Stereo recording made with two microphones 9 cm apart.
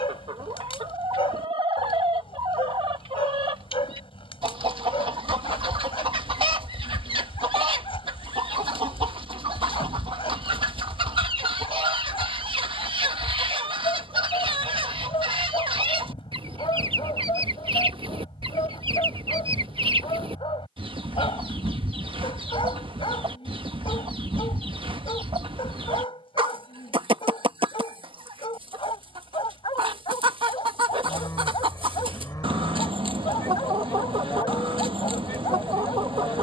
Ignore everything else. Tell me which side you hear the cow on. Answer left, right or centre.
left.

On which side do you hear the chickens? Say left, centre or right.
right.